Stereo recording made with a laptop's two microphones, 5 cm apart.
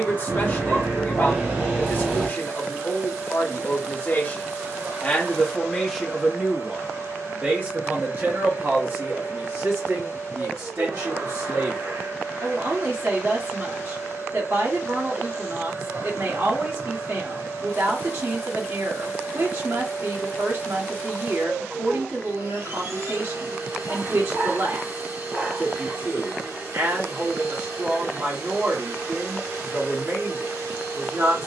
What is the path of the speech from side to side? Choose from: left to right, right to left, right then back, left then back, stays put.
left to right.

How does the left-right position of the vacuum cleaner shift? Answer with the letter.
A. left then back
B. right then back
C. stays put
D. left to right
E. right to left
C.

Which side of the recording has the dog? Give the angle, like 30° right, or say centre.
40° right.